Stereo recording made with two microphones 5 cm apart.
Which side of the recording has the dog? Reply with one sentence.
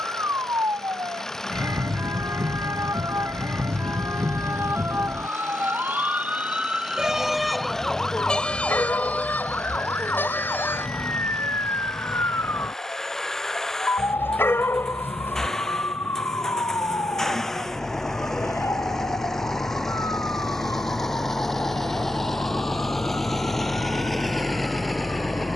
In this clip you hear the dog on the left.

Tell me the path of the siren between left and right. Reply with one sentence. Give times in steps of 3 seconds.
You can hear the siren on the right from 0 s, in the centre from 6 s and on the left from 9 s.